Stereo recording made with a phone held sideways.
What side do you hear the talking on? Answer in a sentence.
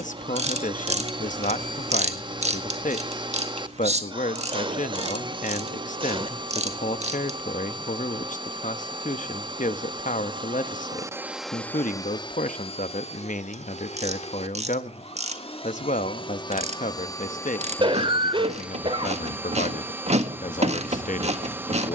You can hear the talking on the left.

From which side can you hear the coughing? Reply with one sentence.
You can hear the coughing on the right.